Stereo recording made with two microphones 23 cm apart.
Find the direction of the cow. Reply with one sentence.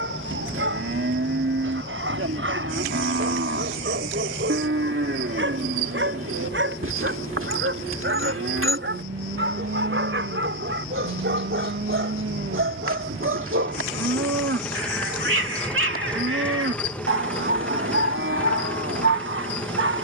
You can hear the cow on the right.